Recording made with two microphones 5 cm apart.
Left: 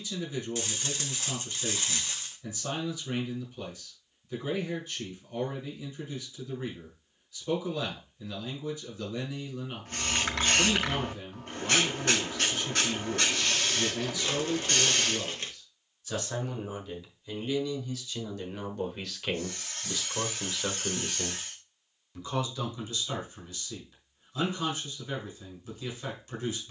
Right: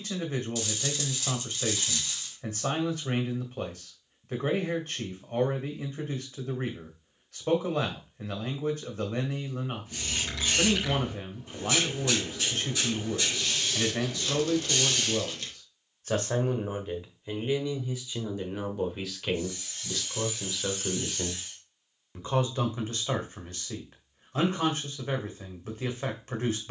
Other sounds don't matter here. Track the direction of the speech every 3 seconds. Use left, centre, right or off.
right, right, right, right, right, right, centre, right, right.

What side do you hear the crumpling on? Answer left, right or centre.
left.